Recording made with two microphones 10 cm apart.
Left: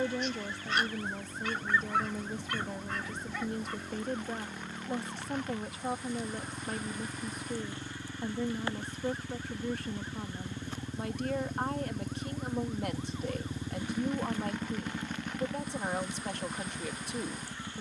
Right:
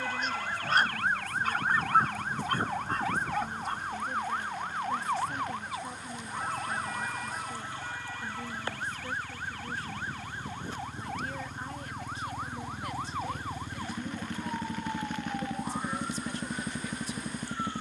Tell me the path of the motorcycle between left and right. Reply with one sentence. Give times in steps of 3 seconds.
In this clip you hear the motorcycle on the left from 0 s and on the right from 15 s.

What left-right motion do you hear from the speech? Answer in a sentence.
In this clip you hear the speech stay in one place.